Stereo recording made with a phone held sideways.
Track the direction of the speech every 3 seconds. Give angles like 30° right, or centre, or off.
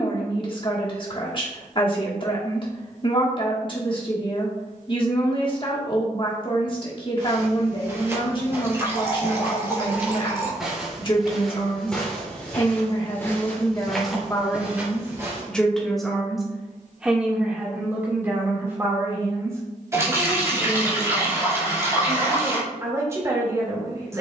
40° left, 40° left, 40° left, 40° left, 30° left, centre, 20° right, 20° right.